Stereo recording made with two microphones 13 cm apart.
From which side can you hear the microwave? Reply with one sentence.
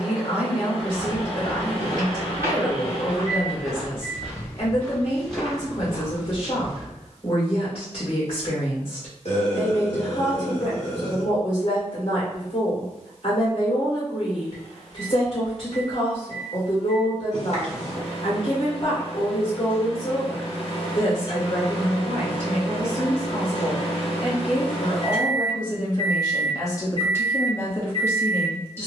You can hear the microwave on the left.